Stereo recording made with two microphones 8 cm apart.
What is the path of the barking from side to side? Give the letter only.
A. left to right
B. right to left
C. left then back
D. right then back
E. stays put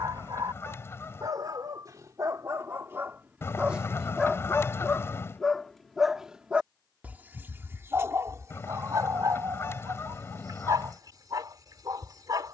C.